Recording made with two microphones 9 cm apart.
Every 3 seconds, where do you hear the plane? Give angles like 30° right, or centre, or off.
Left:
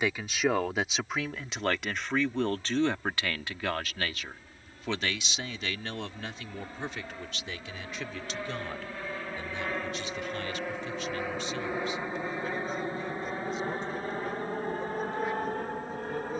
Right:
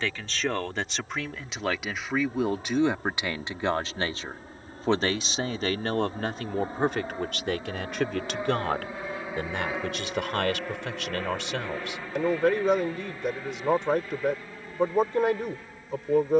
50° right, 40° right, 30° right, centre, 30° left, 50° left.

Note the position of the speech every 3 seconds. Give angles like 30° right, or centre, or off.
centre, 30° right, 60° right, 70° right, 70° right, 70° right.